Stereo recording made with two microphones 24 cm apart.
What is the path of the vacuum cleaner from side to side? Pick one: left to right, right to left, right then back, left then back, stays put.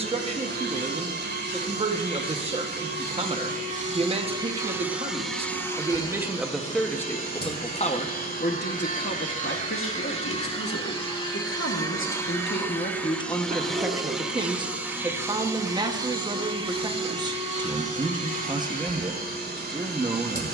left then back.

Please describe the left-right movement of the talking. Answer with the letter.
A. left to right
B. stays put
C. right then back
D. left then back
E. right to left
D.